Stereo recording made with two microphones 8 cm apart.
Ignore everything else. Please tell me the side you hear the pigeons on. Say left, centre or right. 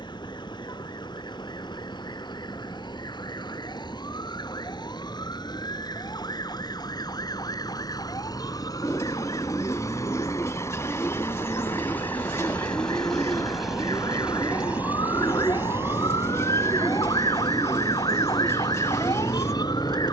left.